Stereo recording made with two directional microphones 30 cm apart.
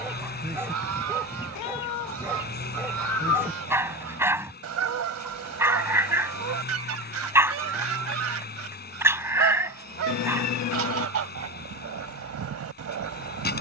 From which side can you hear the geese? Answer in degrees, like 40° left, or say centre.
50° right.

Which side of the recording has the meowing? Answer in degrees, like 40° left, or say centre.
60° left.